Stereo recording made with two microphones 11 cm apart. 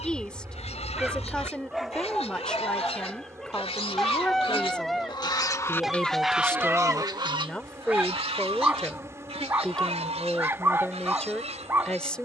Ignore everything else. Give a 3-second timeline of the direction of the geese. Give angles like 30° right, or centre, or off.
70° left, 50° left, 40° right, 80° right.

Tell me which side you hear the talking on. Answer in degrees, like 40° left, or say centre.
10° left.